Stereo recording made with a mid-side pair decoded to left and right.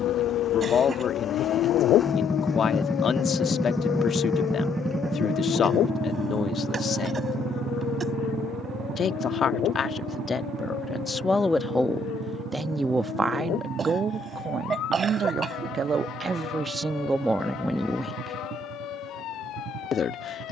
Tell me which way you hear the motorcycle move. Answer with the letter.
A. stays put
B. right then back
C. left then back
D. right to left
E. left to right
E.